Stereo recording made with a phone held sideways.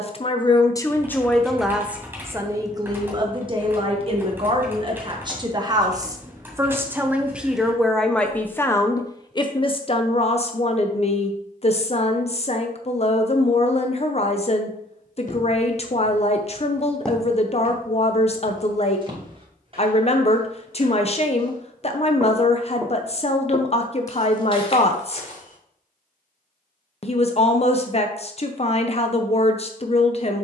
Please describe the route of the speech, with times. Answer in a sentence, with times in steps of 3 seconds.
In this clip you hear the speech in the centre from 0 s, on the right from 3 s, in the centre from 6 s and on the left from 9 s.